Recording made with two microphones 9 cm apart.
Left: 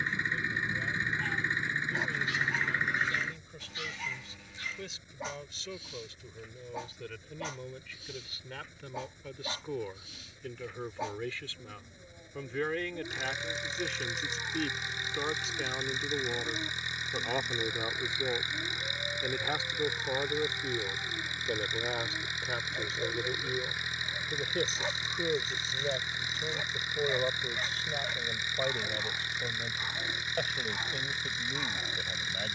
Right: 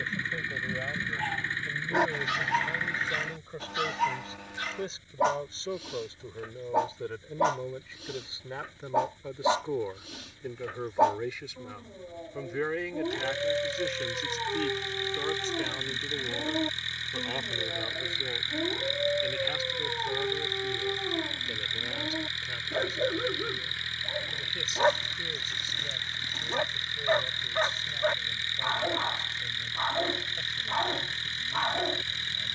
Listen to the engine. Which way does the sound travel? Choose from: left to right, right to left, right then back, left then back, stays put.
stays put.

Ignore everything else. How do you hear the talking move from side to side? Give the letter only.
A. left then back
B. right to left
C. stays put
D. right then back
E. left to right
B.